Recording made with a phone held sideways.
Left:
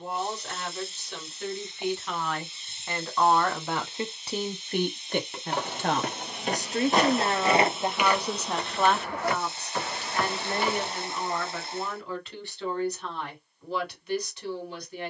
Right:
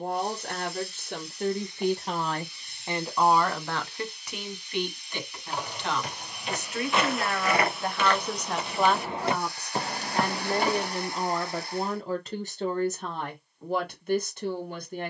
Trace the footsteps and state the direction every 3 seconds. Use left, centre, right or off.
off, left, left, right, off.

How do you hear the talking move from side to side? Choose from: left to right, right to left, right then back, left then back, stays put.
left then back.